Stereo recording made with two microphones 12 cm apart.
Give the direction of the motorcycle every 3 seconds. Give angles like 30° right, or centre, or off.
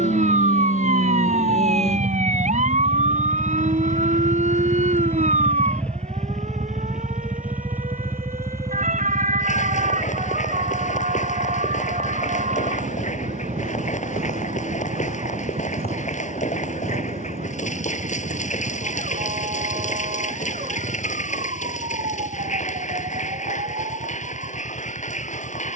60° left, 30° left, 10° right, 40° right, 50° right, 50° right, 60° right, 60° right, 60° right.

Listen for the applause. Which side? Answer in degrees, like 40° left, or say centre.
80° left.